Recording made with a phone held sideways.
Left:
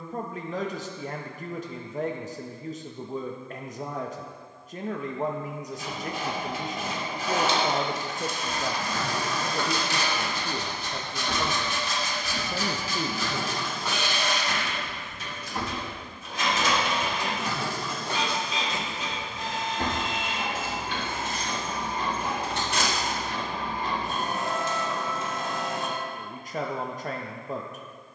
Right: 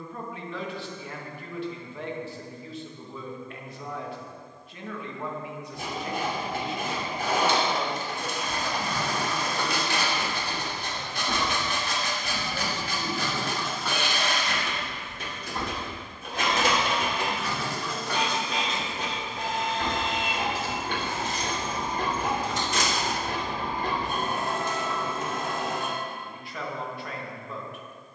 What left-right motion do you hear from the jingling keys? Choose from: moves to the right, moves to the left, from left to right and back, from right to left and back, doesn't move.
moves to the left.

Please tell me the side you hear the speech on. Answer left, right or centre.
left.